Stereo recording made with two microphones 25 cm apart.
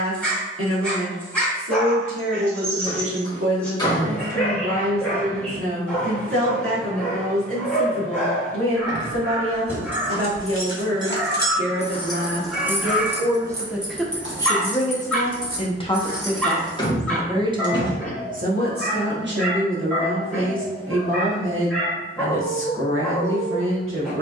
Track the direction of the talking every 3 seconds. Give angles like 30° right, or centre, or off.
60° right, 60° right, 60° right, 60° right, 10° right, centre, 50° right, 60° right.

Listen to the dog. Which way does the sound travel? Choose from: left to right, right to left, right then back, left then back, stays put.
stays put.